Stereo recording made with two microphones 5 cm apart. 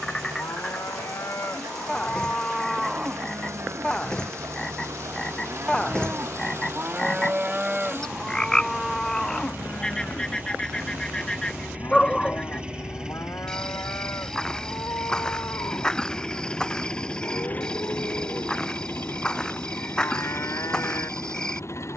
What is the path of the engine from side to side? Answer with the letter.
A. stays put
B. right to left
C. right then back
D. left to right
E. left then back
B.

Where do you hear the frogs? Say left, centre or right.
centre.